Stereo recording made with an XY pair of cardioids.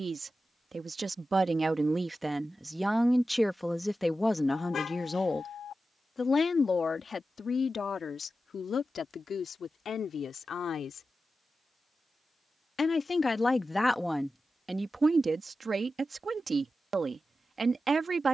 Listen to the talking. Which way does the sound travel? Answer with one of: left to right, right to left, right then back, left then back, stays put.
left then back.